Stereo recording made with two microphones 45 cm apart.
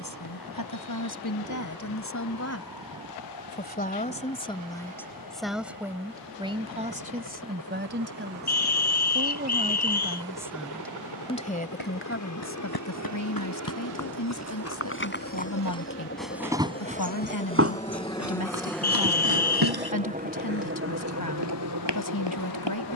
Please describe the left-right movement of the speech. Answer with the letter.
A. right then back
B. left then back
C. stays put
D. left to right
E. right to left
A.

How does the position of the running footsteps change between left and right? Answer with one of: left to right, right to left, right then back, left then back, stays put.
left to right.